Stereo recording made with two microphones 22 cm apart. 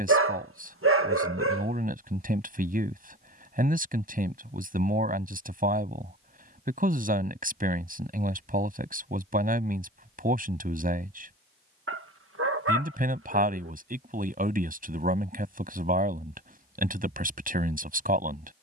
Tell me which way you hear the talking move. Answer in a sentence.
You can hear the talking stay in one place.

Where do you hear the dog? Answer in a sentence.
In this clip you hear the dog on the right.